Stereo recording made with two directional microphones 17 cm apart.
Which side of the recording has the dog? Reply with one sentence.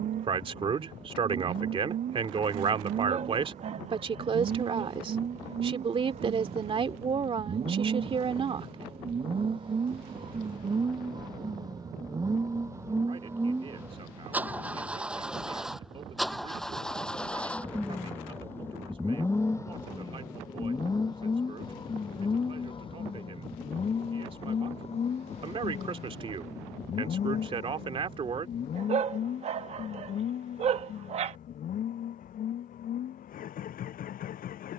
You can hear the dog on the right.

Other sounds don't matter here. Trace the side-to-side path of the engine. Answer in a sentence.
You can hear the engine travel towards the left.